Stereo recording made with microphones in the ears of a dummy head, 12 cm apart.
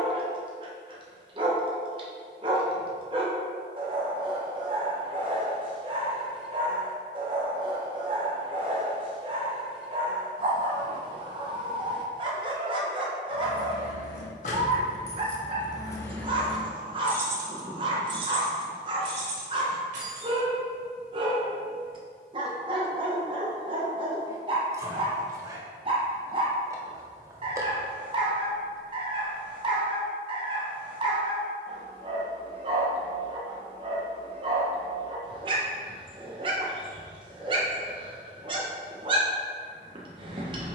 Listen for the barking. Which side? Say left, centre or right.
right.